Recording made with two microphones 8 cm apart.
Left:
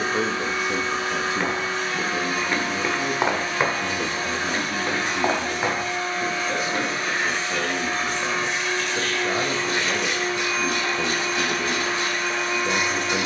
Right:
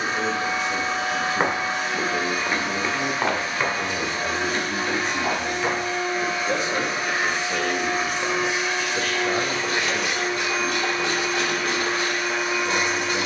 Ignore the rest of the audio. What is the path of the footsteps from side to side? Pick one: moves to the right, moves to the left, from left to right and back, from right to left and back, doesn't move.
moves to the left.